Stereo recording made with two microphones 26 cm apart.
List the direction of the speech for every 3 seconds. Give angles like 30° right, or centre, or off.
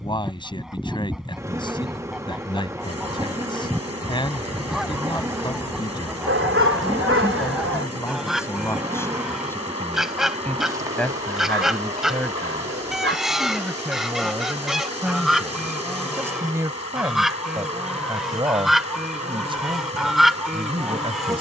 20° left, 20° left, 10° left, 10° left, centre, 10° right, 20° right.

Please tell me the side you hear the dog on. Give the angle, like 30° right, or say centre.
60° right.